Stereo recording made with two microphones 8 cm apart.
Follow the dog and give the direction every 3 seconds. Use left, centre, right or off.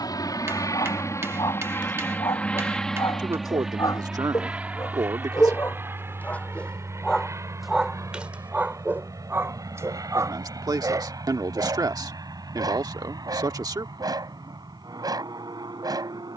left, left, centre, right, right, right.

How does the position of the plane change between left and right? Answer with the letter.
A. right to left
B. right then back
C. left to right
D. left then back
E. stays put
C.